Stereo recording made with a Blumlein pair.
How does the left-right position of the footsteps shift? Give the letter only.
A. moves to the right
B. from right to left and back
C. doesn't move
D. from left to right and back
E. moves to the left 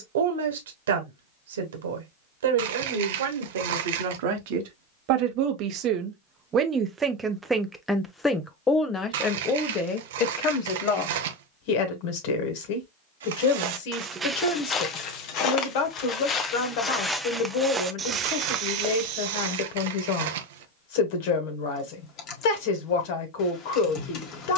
B.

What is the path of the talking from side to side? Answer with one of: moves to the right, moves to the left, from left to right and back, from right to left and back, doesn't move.
moves to the left.